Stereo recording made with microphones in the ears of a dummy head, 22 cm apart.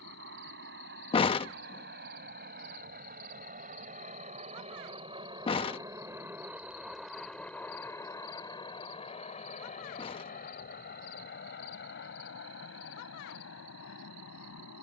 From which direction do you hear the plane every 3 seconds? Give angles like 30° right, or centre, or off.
50° right, 30° right, 10° left, 40° left, 50° left.